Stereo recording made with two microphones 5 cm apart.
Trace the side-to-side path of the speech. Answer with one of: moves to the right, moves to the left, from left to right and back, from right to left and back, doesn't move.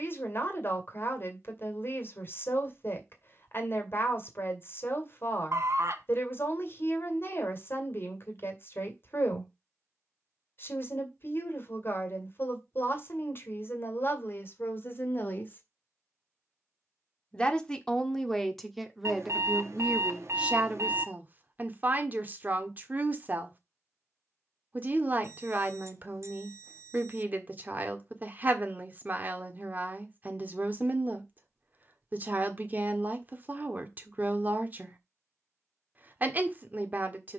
moves to the right.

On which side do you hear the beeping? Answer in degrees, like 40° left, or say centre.
60° right.